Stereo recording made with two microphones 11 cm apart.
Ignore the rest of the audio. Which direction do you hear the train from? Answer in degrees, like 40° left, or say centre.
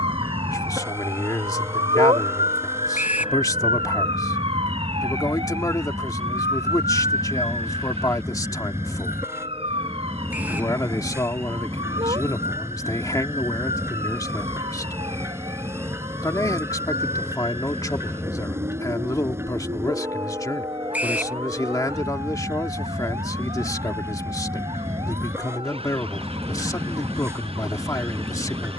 20° right.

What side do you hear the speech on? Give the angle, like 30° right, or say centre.
30° left.